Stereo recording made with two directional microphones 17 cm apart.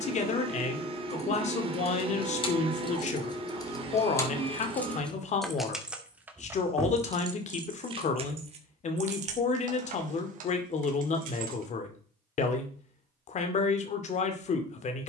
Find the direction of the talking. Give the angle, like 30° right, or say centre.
50° left.